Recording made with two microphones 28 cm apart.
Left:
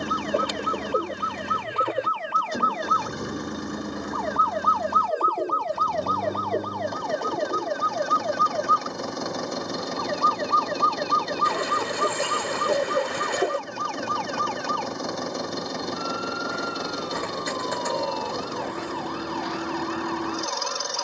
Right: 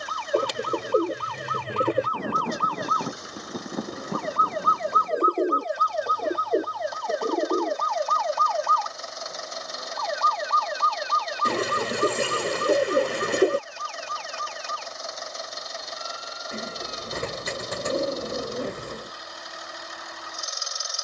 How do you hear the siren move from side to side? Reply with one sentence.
You can hear the siren go from the right side to the left.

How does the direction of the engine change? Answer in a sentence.
In this clip you hear the engine stay in one place.